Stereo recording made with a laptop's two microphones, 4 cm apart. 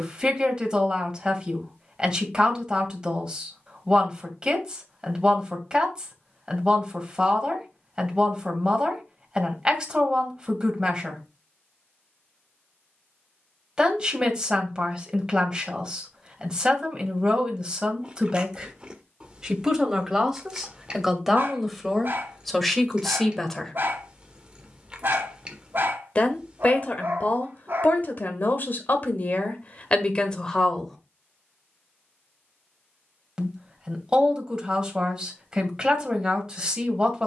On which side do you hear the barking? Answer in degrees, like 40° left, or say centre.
50° right.